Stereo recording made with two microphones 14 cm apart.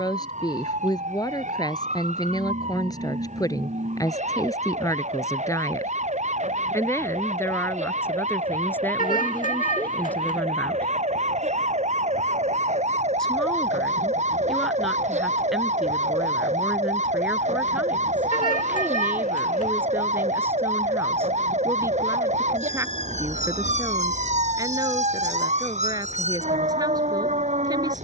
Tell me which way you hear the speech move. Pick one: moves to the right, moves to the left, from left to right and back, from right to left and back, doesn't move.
moves to the right.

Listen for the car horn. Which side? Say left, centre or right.
left.